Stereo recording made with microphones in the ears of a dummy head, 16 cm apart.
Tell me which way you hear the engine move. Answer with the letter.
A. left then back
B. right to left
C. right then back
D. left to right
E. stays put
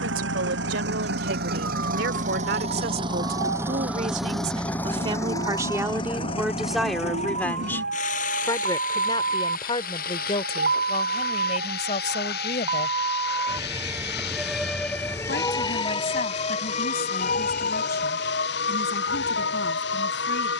B.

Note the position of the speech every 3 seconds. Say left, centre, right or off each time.
right, right, centre, left, left, left, left.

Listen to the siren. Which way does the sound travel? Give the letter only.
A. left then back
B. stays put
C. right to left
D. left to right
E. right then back
C.